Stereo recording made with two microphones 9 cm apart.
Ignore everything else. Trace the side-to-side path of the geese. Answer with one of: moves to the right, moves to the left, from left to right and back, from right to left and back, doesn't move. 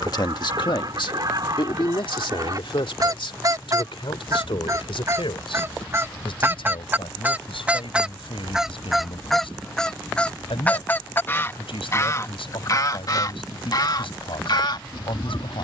moves to the left.